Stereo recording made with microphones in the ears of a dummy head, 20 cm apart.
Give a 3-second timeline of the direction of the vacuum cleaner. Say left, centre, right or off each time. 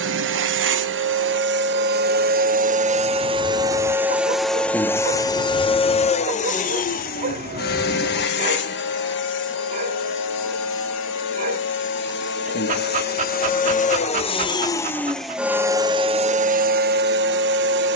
right, centre, left, left, left, right.